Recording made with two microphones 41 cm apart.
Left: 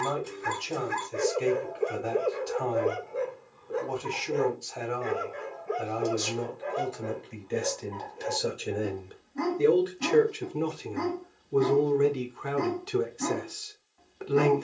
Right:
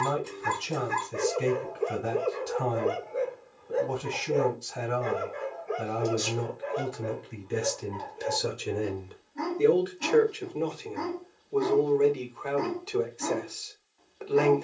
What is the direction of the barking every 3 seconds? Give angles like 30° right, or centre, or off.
10° right, 30° left, 60° left, 60° left, 60° left.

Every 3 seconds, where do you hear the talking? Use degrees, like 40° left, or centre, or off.
30° right, 30° right, 20° right, 20° left, 30° left.